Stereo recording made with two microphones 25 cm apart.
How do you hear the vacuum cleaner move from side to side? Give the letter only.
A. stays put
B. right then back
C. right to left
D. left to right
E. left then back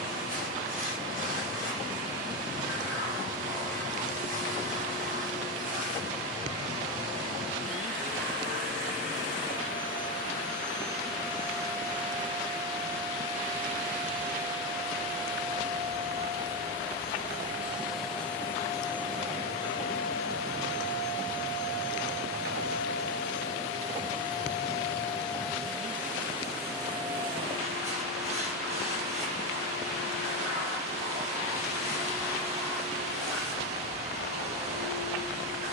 E.